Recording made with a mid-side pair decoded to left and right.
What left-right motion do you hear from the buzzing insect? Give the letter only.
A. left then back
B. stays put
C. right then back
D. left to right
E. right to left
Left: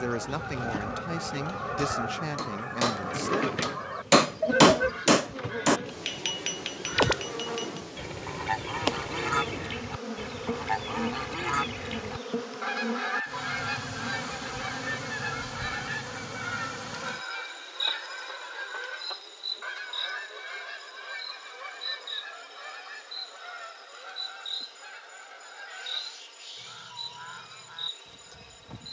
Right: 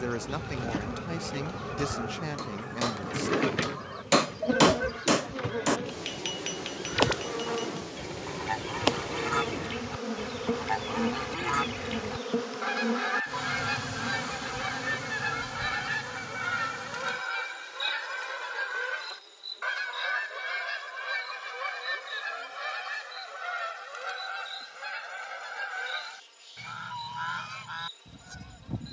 E.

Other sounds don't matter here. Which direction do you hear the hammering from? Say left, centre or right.
left.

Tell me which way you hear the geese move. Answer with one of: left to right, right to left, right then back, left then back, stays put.
left to right.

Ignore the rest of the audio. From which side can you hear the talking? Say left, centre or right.
centre.